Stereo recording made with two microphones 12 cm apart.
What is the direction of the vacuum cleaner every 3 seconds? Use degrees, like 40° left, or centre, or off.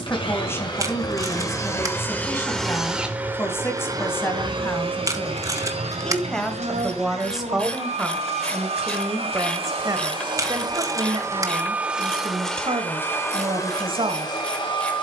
20° left, 40° right, 70° right, 40° right, 20° left.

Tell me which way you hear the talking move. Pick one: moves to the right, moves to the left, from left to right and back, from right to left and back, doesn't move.
moves to the right.